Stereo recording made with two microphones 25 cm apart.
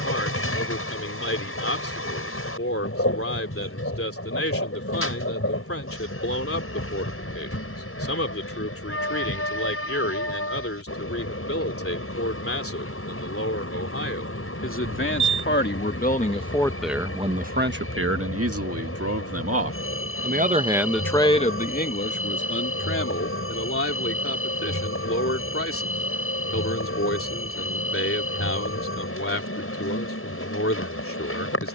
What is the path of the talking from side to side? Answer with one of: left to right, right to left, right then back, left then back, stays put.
right then back.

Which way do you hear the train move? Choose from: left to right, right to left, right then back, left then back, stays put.
stays put.